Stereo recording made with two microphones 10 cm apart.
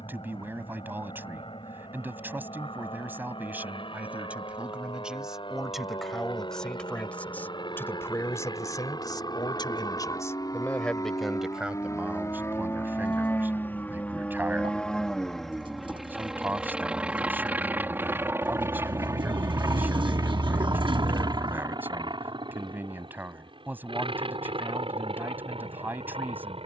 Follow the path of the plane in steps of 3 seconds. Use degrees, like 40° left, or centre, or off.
60° left, 60° left, 50° left, 40° left, 20° left, 10° right, 30° right, 50° right, 60° right.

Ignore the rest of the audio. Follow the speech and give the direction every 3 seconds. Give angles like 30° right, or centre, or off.
20° right, 10° right, 20° left, 20° left, 20° right, 20° right, 20° right, 20° right, 20° right.